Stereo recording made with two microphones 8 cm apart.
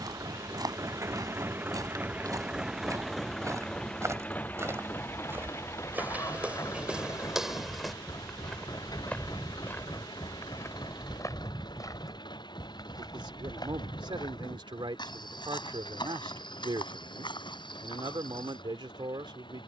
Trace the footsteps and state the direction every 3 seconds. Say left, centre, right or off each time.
right, right, centre, left, left, left, left.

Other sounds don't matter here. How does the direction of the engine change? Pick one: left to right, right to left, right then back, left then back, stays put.
right to left.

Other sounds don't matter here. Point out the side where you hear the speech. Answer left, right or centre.
right.